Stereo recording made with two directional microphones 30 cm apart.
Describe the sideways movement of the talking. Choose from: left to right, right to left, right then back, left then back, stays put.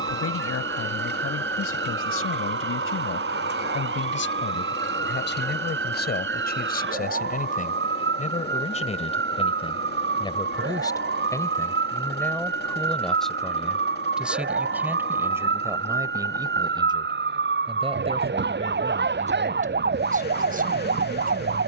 left to right.